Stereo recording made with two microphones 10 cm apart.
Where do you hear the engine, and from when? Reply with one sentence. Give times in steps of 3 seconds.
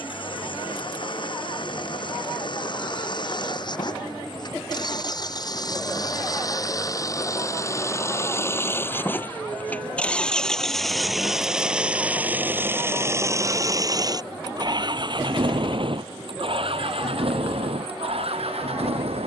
You can hear the engine on the left from 0 s, in the centre from 9 s and on the right from 12 s.